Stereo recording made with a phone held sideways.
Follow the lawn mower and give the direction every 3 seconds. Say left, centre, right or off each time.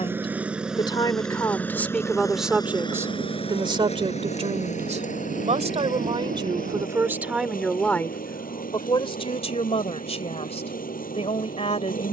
centre, left, left, left.